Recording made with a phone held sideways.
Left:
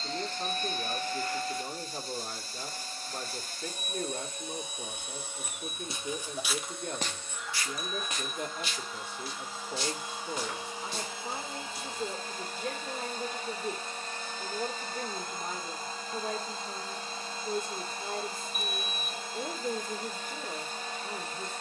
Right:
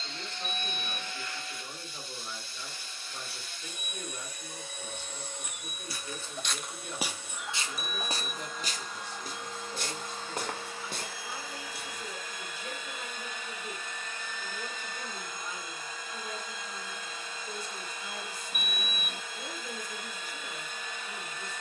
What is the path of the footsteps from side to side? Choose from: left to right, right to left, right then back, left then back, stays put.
left to right.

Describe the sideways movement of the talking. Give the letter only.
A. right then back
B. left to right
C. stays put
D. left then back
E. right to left
C.